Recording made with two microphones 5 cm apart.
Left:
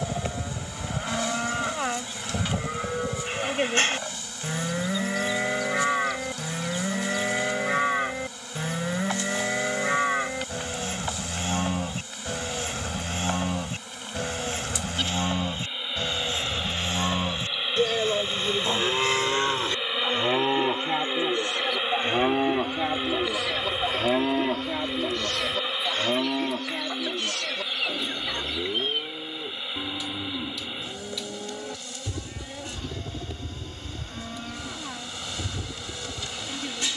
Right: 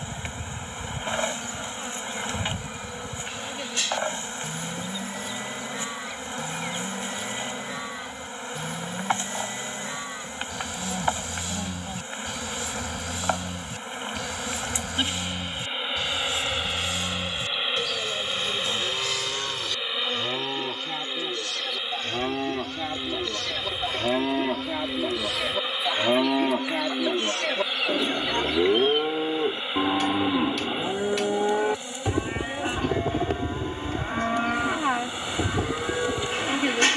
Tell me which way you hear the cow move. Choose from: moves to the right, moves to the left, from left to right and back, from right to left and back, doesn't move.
moves to the right.